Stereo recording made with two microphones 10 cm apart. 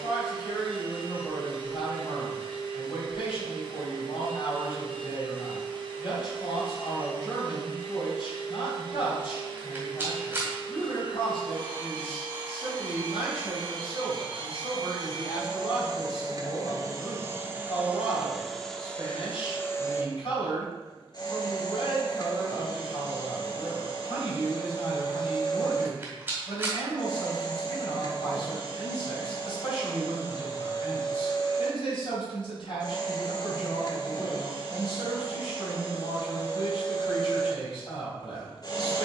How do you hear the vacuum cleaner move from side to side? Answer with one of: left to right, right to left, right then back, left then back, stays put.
right to left.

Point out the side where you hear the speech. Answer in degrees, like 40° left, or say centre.
60° left.